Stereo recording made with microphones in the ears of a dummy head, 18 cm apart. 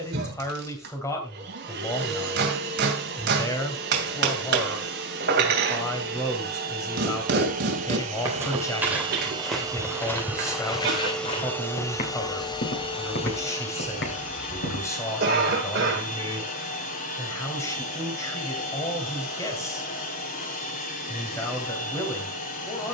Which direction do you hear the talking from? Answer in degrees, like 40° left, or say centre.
10° left.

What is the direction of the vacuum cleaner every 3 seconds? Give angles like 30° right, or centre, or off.
50° right, 50° right, 40° right, centre, 30° left, 40° left, 40° left, 40° left.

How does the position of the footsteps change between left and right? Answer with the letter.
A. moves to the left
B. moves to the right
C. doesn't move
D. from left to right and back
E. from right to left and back
A.